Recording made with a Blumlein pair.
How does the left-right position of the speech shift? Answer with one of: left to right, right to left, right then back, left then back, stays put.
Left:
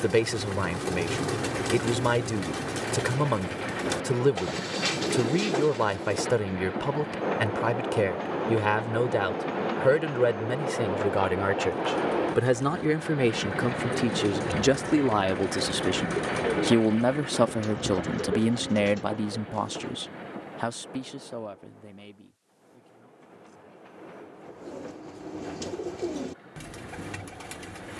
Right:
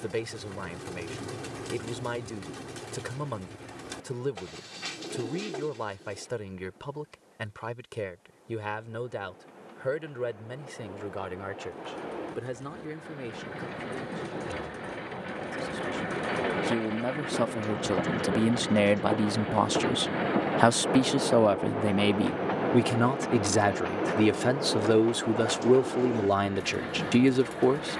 left to right.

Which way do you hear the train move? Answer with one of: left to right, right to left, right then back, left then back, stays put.
left to right.